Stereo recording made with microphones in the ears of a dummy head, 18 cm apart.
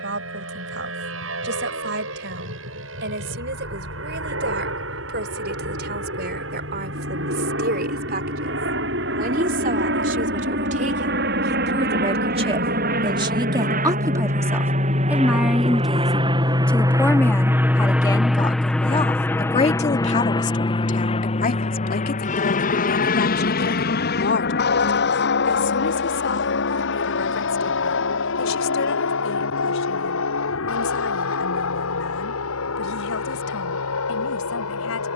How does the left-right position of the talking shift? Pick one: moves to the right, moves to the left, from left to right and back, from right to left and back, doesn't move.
moves to the left.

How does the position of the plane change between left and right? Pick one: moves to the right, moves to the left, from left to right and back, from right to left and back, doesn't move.
moves to the left.